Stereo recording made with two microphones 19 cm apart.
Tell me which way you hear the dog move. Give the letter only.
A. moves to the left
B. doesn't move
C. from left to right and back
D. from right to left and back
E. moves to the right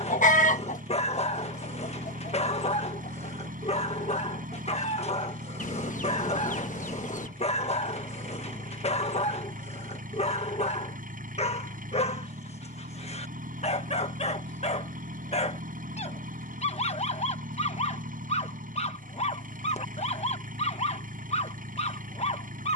B.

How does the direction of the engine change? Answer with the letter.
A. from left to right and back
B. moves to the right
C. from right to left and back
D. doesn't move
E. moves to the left
D.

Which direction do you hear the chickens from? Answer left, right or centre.
left.